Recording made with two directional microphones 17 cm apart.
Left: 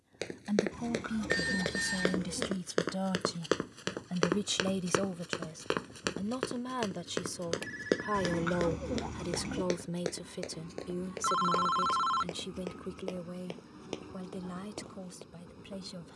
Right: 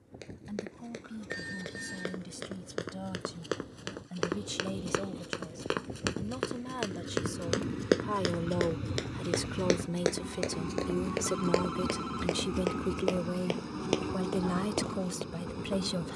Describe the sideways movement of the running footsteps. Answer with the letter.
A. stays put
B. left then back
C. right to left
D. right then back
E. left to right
E.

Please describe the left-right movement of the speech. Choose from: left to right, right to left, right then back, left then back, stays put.
left to right.